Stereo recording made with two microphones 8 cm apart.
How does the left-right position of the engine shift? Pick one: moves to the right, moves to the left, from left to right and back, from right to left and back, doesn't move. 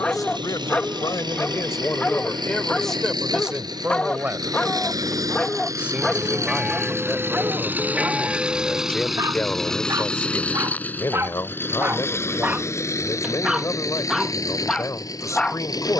moves to the left.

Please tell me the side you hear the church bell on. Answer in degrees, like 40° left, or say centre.
10° right.